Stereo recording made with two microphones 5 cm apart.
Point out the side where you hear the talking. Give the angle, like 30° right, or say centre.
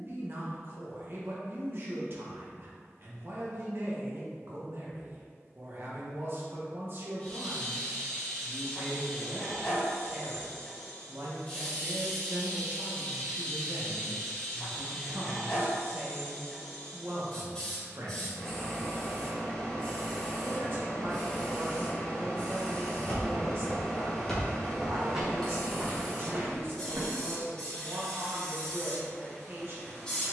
50° right.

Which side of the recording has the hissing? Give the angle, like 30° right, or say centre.
20° left.